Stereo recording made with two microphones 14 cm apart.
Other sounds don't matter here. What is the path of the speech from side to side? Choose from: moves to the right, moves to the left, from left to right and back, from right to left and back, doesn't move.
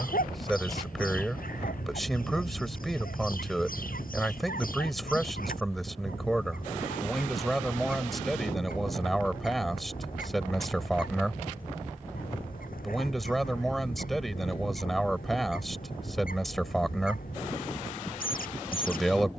doesn't move.